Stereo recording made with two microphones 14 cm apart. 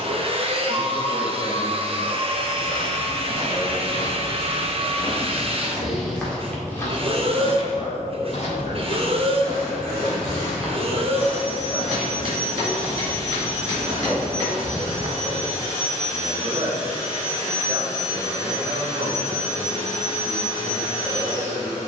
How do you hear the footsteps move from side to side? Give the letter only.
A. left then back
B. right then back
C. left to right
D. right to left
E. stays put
A.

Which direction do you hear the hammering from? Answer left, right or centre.
right.